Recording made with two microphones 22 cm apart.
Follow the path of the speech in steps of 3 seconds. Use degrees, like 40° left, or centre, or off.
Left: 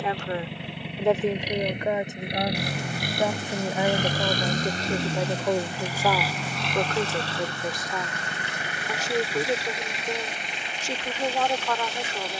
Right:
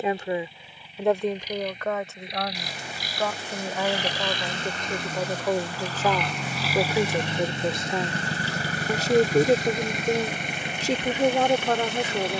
10° left, 10° left, 20° right, 40° right.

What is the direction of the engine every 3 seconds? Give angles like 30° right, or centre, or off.
70° left, 40° left, 20° right, 50° right.